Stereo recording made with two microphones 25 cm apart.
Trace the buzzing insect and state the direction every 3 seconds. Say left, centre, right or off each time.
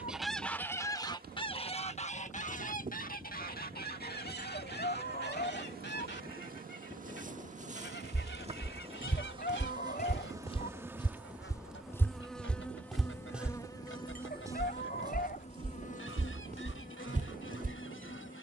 right, right, right, centre, centre, left.